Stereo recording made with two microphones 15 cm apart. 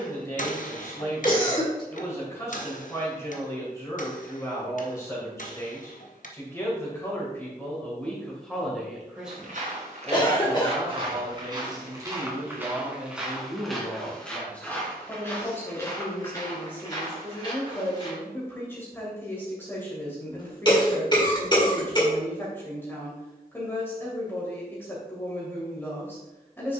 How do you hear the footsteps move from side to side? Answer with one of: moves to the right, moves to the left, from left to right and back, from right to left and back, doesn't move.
moves to the left.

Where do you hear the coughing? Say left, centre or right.
left.